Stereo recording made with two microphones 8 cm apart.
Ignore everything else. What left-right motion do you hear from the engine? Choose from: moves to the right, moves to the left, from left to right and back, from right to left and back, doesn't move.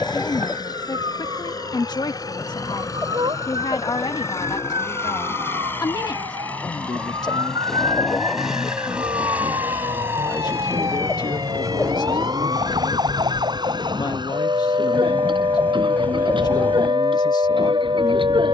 moves to the right.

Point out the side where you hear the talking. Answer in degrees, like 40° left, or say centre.
50° left.